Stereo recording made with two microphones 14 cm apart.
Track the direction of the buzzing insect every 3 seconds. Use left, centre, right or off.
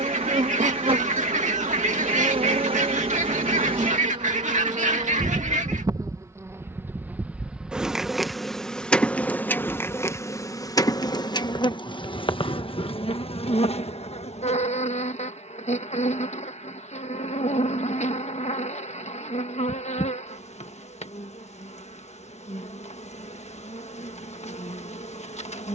right, right, centre, left, left, left, left, left, left.